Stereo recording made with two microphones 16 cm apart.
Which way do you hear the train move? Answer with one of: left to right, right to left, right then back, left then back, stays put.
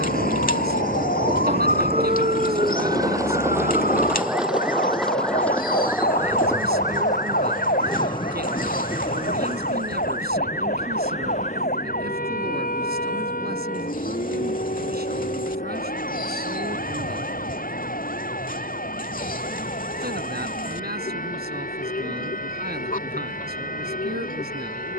right to left.